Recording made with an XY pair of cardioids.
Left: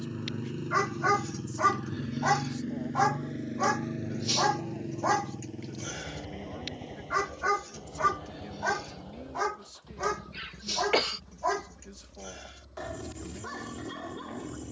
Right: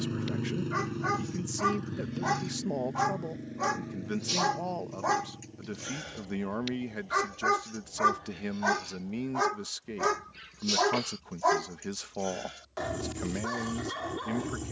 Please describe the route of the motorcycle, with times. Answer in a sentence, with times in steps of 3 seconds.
You can hear the motorcycle in the centre from 0 s and on the left from 3 s.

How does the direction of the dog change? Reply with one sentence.
You can hear the dog move from left to right.